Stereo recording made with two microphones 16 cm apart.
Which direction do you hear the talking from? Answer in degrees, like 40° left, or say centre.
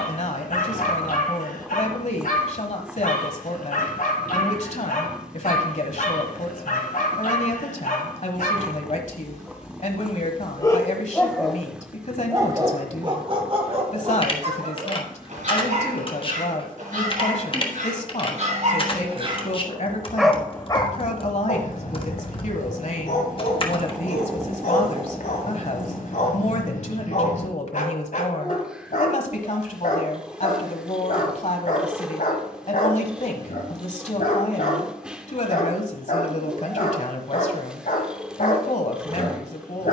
50° left.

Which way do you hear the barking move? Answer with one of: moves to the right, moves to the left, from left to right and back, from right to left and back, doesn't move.
from left to right and back.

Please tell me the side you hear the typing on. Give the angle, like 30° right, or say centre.
40° left.